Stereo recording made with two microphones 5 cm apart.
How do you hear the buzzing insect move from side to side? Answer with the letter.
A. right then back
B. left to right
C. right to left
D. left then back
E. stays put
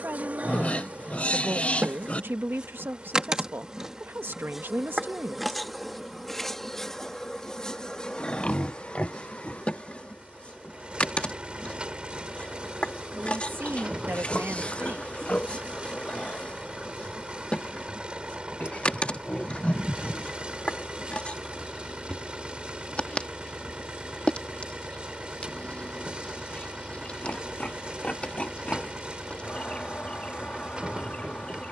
C.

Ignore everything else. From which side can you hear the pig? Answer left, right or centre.
left.